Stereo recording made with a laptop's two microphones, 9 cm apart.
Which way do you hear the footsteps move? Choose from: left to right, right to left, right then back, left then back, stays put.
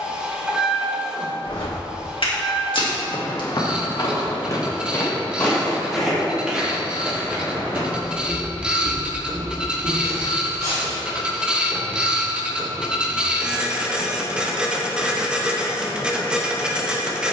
left to right.